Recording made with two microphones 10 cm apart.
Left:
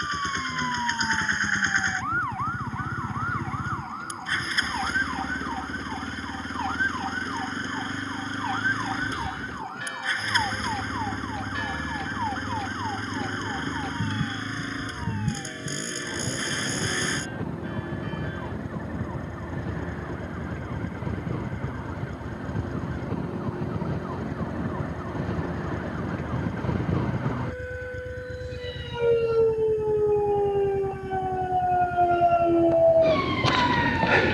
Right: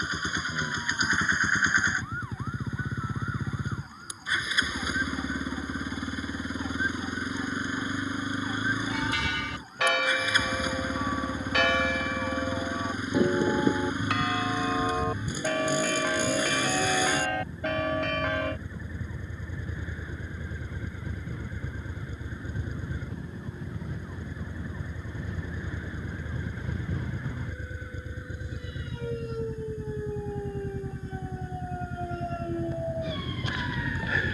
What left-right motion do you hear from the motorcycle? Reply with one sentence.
You can hear the motorcycle stay in one place.